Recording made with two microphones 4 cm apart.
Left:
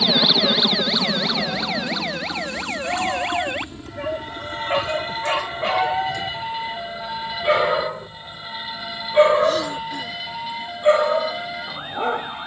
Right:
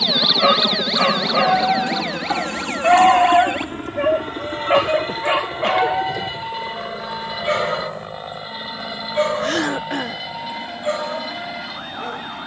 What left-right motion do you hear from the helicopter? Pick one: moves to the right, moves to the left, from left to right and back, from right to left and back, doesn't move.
moves to the right.